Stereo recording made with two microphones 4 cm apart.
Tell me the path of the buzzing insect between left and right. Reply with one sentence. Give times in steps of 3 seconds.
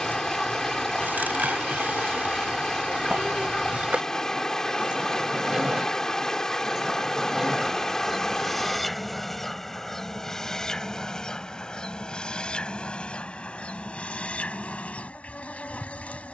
You can hear the buzzing insect on the right from 0 s, in the centre from 6 s and on the left from 12 s.